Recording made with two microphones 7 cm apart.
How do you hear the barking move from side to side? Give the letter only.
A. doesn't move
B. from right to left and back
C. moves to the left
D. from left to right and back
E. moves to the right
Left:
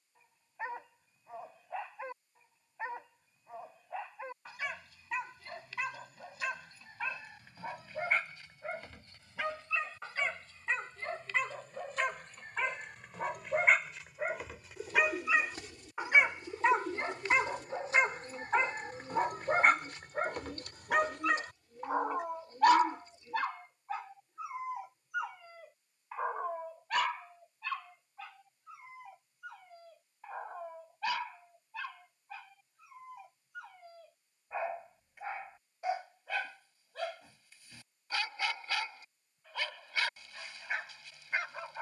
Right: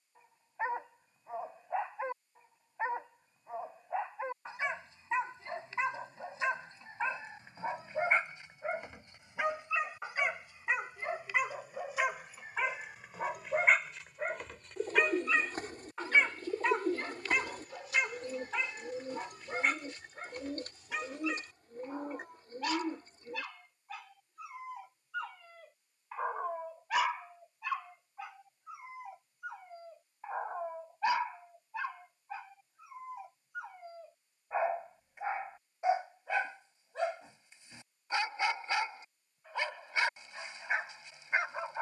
B.